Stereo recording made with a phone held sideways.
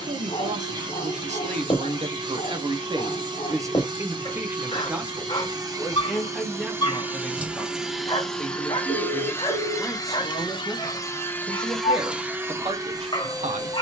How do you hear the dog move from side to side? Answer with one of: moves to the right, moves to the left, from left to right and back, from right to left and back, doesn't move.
doesn't move.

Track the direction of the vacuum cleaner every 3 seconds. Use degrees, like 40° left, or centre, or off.
30° right, 30° right, 10° right, 20° left, 20° right.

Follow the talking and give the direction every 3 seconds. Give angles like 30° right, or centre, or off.
60° right, 20° right, centre, 10° right, 50° right.